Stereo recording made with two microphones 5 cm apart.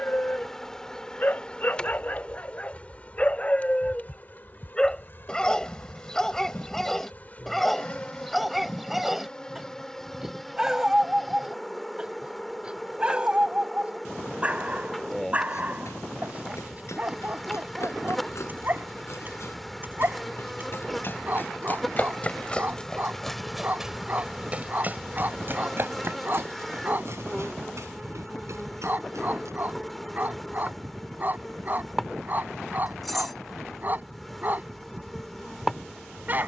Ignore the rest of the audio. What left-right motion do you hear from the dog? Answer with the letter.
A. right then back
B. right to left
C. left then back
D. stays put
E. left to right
E.